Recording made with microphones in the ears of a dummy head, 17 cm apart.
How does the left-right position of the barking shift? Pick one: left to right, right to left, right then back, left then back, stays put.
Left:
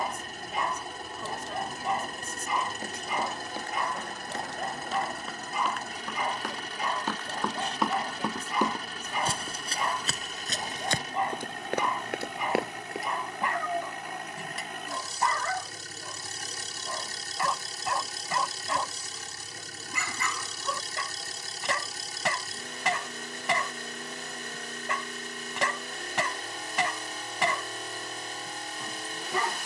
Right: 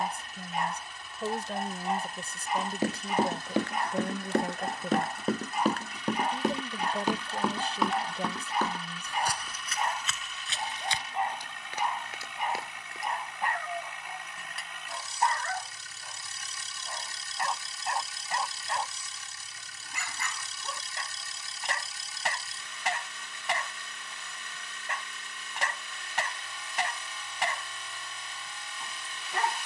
stays put.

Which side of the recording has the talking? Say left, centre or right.
right.